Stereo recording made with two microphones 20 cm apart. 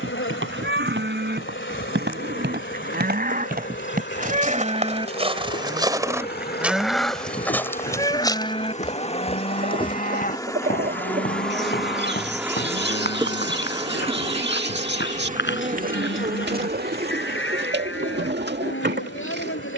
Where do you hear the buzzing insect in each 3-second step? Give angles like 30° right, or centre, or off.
70° left, 60° left, 40° left, 10° left, 20° right, 50° right, 60° right.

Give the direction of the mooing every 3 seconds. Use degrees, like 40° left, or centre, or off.
60° right, 30° right, 10° left, 40° left, 60° left, 70° left, 70° left.